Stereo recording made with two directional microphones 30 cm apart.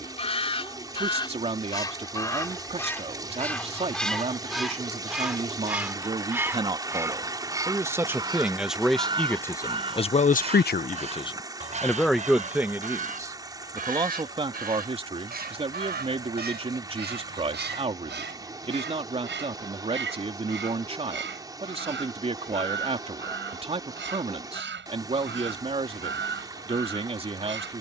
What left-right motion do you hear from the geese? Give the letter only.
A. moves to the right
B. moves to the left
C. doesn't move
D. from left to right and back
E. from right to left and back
A.